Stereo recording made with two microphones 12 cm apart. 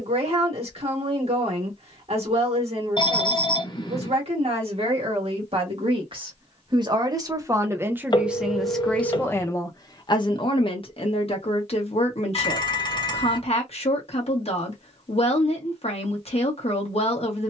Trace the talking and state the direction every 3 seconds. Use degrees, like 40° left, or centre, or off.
60° right, 60° right, 20° right, 40° left, 60° left, 60° left.